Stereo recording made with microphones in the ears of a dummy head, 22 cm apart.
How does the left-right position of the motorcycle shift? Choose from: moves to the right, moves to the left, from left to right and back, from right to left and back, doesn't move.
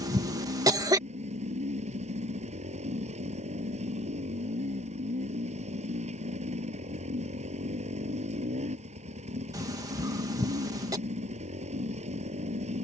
doesn't move.